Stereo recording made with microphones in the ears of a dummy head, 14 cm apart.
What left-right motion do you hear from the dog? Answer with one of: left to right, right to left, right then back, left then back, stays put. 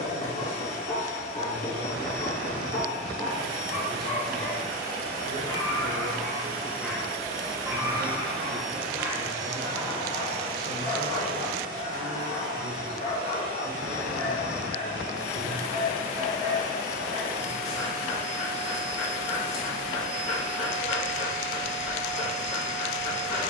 right then back.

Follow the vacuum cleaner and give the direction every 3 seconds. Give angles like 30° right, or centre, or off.
60° left, 50° left, 20° left, 30° right, 50° right, 50° right, 50° right, 50° right.